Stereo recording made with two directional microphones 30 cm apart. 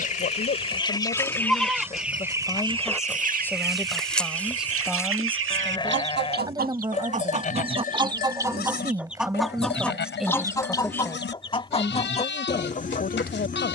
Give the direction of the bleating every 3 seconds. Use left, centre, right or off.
centre, centre, left, left, left.